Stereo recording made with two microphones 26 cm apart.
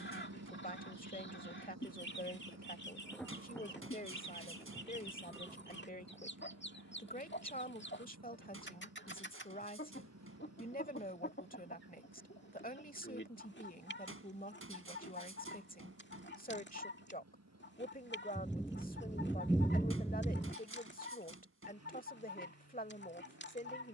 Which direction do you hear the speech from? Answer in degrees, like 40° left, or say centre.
30° left.